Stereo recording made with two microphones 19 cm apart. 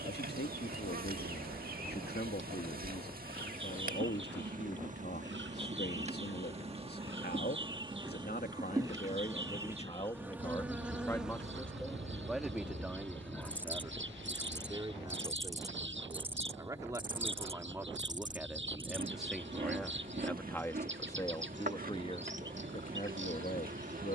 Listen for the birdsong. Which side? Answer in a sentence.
You can hear the birdsong on the right.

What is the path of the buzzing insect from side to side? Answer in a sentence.
In this clip you hear the buzzing insect go left and come back.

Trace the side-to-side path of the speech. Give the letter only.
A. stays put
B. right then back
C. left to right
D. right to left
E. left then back
B.